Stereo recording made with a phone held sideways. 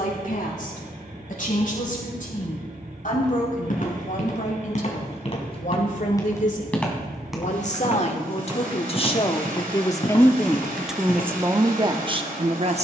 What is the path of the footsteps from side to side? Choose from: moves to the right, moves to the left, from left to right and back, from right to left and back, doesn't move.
from left to right and back.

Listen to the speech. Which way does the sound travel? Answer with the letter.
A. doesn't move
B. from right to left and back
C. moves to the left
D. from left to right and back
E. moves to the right
E.